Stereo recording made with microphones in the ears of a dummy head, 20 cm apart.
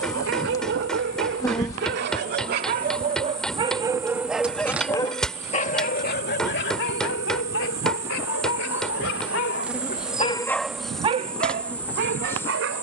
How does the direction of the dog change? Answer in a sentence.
In this clip you hear the dog move from right to left and back again.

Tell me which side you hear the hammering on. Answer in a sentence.
In this clip you hear the hammering in the centre.